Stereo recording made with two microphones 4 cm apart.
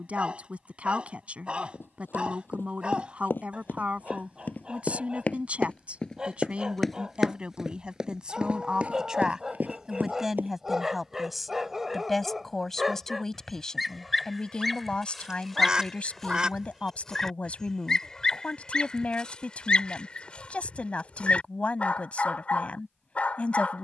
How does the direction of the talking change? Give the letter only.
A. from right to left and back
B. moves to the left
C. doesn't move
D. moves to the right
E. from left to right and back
B.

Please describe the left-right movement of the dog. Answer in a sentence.
In this clip you hear the dog travel towards the left.